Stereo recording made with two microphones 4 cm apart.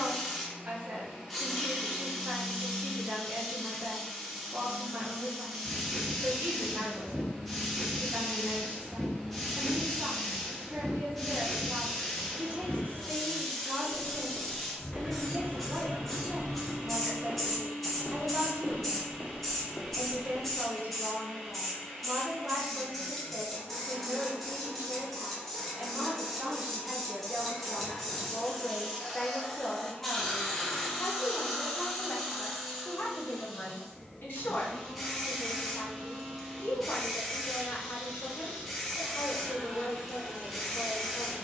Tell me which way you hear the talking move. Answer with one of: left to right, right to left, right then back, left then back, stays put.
right to left.